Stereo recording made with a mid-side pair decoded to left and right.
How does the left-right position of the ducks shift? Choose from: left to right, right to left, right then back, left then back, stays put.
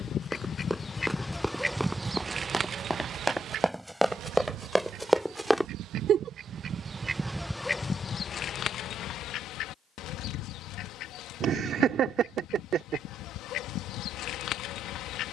right then back.